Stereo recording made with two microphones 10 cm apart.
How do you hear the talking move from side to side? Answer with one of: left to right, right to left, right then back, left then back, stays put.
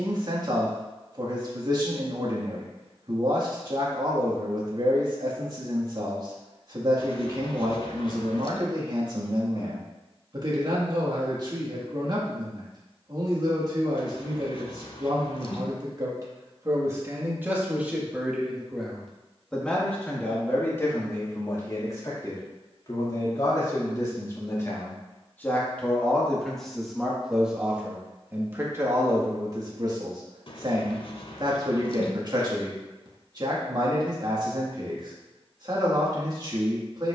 left then back.